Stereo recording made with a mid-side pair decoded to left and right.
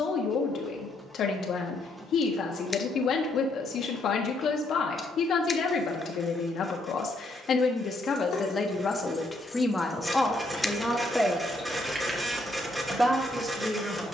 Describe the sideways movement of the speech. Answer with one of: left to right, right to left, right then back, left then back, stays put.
left to right.